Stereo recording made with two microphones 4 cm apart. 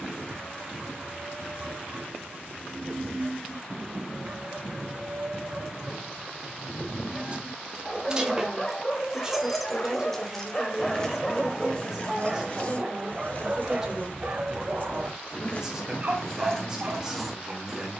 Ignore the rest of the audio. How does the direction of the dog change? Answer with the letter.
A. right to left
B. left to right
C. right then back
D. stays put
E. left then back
E.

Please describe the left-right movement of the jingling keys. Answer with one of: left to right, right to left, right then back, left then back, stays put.
left then back.